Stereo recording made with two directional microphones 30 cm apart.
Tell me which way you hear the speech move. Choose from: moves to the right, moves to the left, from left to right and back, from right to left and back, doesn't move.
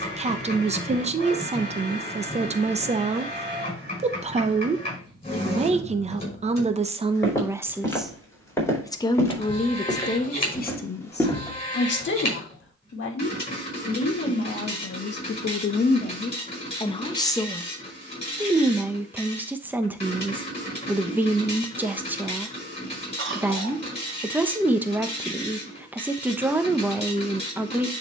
from right to left and back.